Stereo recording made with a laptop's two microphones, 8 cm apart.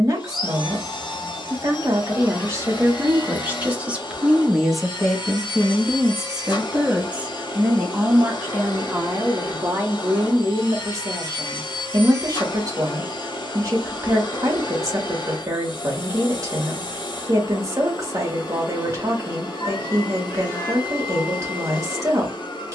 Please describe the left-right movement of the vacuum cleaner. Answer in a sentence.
In this clip you hear the vacuum cleaner stay in one place.